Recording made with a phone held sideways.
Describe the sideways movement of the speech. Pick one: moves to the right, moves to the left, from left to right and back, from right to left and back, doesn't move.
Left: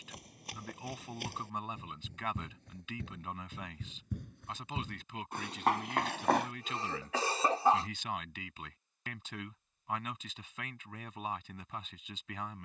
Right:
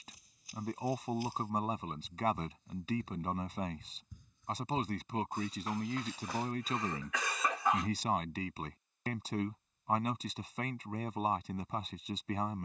doesn't move.